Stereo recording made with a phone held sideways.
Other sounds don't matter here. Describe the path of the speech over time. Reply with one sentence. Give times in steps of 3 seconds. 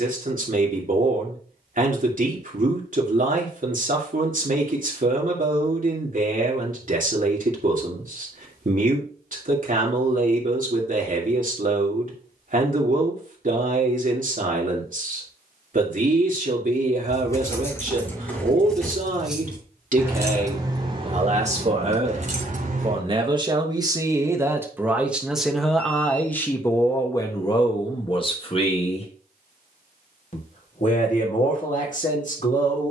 In this clip you hear the speech on the right from 0 s, in the centre from 24 s and on the left from 27 s.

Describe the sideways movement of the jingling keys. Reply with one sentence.
You can hear the jingling keys move to the right.